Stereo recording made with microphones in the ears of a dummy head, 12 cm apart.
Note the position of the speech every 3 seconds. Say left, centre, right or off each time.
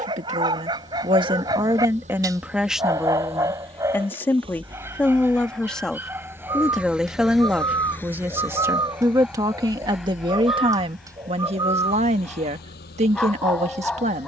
right, centre, centre, right, right.